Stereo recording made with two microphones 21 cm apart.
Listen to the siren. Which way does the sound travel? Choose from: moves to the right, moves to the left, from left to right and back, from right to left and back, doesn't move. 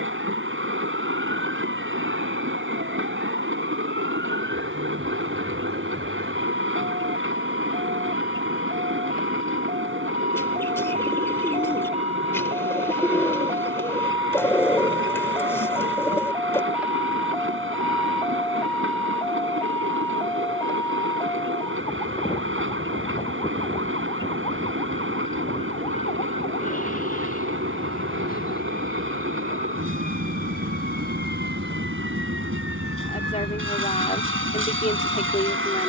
moves to the left.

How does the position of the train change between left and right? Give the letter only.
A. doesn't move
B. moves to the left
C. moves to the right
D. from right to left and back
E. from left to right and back
A.